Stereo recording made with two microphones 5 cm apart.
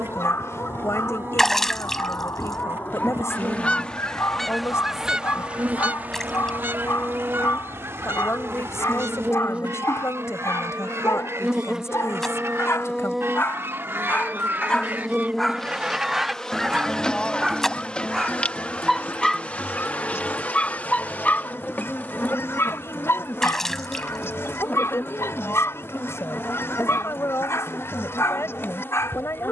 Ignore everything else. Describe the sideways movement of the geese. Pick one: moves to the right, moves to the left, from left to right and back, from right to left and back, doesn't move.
from left to right and back.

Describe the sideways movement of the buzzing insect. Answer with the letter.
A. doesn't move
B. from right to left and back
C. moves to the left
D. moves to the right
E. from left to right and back
C.